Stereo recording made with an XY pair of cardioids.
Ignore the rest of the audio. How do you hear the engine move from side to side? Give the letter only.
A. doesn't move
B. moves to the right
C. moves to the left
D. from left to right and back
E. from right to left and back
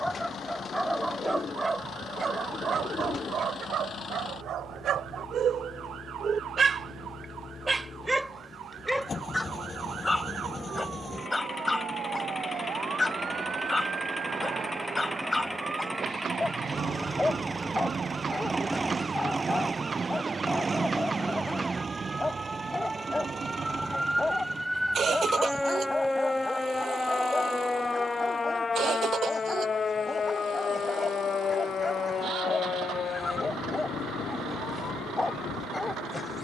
B.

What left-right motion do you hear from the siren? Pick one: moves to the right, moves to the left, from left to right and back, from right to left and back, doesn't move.
moves to the left.